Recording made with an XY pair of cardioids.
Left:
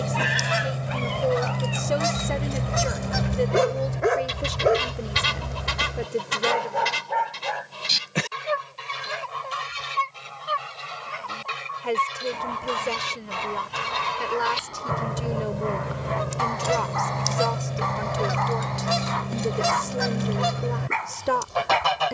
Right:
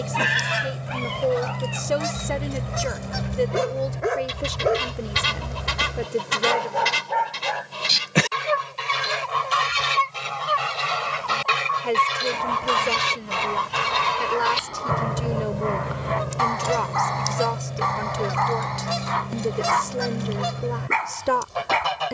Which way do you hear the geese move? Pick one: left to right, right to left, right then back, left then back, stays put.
right then back.